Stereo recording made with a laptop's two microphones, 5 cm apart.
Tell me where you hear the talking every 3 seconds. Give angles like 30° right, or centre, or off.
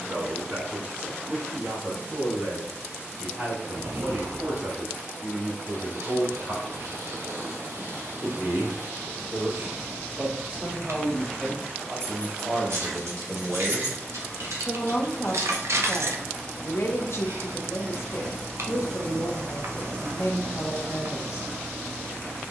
50° right, 50° right, 40° right, 30° right, centre, 50° left, 60° left, 60° left.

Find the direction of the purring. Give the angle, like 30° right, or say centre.
70° right.